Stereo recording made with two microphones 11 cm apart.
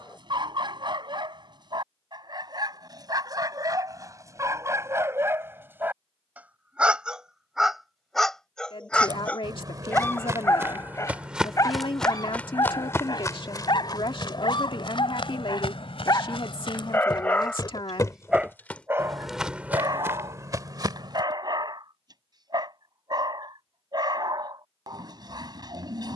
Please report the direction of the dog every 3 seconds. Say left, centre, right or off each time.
right, right, centre, left, left, left, right, right, right.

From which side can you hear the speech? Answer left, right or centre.
left.